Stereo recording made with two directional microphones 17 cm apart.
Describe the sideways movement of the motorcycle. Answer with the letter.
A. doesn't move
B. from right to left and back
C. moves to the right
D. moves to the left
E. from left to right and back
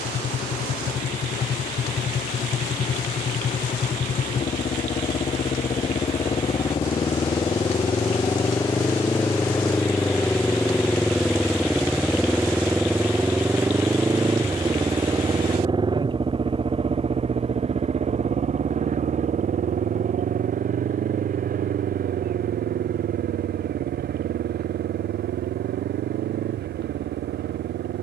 C.